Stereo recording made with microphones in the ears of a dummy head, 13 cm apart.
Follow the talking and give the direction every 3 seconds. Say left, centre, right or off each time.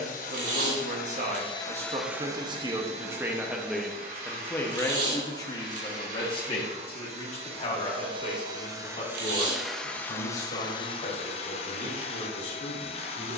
right, centre, left, left, left.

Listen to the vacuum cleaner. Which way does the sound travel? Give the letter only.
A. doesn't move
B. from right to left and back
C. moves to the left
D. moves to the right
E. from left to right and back
E.